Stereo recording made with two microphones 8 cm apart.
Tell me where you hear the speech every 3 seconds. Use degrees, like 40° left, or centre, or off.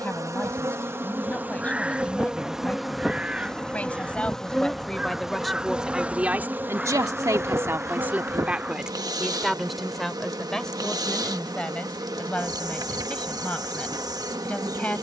20° left, 10° left, 30° right, 10° left, 20° left.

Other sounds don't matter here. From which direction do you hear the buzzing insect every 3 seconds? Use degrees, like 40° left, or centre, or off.
20° right, centre, 40° right, 50° right, 50° right.